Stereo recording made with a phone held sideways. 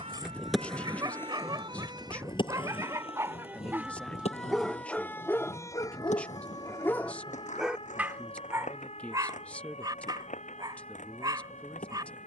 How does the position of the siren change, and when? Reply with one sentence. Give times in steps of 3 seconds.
In this clip you hear the siren on the right from 0 s, in the centre from 3 s and on the left from 6 s.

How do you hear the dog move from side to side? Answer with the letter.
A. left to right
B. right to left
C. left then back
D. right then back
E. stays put
C.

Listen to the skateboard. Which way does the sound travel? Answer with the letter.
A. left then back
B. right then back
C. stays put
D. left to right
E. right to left
E.